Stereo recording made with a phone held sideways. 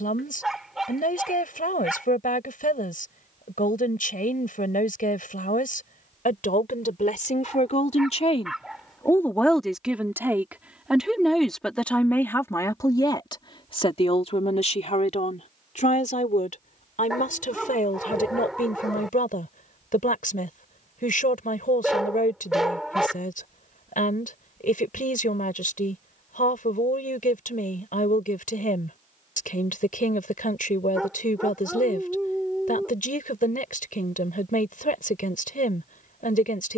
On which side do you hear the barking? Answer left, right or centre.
centre.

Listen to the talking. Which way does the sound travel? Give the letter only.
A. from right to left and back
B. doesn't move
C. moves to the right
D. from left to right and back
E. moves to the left
D.